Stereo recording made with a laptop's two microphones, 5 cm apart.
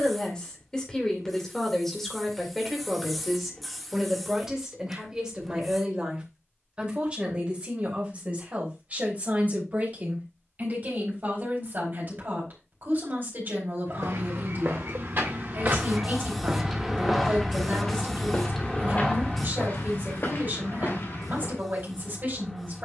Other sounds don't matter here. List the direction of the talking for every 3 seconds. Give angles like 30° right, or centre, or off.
10° left, 10° right, 30° right, 40° right, 40° right, 40° right, 40° right, 40° right.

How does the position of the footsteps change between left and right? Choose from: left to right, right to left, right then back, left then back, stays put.
right to left.